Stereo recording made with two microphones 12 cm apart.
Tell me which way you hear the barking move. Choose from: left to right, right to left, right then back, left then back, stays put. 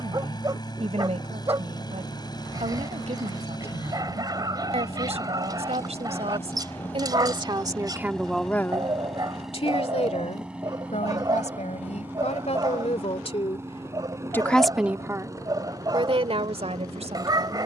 stays put.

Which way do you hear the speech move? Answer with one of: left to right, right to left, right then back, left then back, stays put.
left then back.